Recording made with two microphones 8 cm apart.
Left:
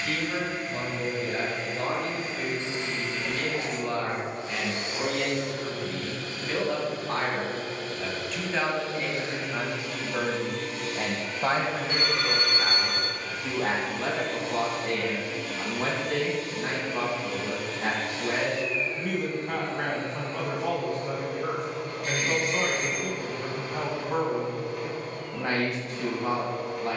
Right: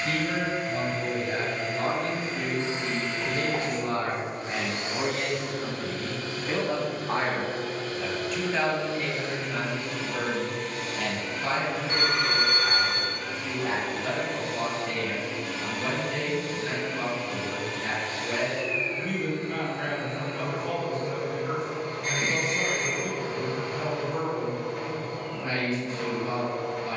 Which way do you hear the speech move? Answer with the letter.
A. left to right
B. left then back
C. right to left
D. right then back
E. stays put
C.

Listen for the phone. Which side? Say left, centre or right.
right.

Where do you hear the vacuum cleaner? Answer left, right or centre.
right.